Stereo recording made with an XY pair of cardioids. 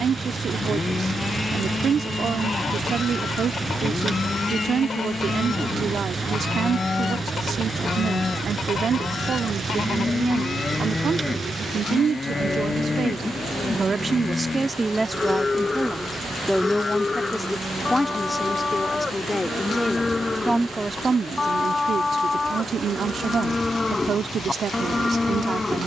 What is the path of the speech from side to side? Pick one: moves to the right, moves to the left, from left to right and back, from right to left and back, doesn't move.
from right to left and back.